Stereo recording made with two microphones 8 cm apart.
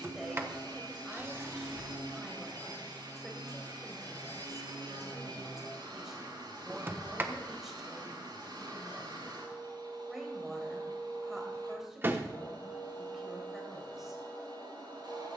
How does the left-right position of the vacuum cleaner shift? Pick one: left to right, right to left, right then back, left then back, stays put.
stays put.